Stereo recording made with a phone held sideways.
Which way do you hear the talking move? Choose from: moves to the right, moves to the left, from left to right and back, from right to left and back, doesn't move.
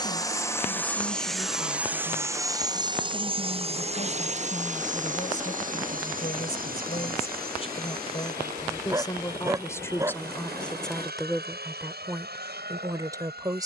moves to the right.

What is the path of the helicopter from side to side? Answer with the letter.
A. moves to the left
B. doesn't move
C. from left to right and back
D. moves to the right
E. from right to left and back
D.